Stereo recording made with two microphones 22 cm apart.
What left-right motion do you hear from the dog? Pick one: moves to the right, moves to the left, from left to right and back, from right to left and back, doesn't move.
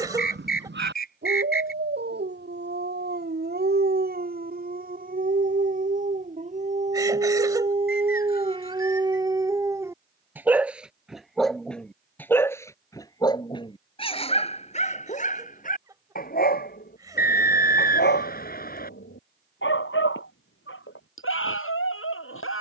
moves to the left.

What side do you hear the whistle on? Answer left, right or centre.
left.